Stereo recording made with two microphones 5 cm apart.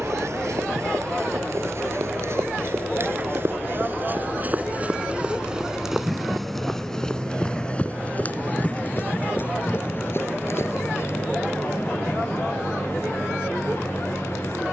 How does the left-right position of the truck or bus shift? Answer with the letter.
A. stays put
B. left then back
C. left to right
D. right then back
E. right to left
E.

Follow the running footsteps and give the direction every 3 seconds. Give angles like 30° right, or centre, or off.
60° right, 30° right, 20° left, 50° left, off.